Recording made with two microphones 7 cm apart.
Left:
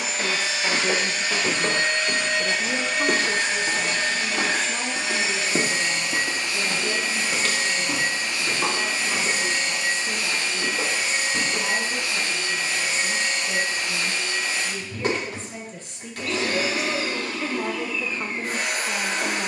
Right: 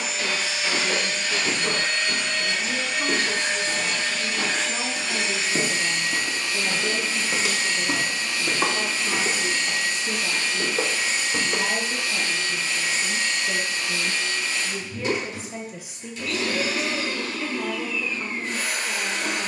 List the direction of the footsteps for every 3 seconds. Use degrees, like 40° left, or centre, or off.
70° left, 50° left, 10° right, 60° right, off, off, off.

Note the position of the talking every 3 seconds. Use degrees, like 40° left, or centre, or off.
50° left, 10° left, 20° right, 30° right, 30° right, centre, 40° left.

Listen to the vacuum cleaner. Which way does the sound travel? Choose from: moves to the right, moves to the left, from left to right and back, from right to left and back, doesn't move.
doesn't move.